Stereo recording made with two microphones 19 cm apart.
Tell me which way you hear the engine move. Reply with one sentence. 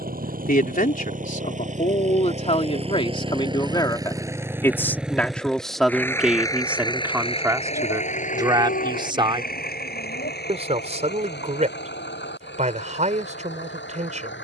In this clip you hear the engine move to the left.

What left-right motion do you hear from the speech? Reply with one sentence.
You can hear the speech go from the left side to the right.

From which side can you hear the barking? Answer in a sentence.
You can hear the barking on the left.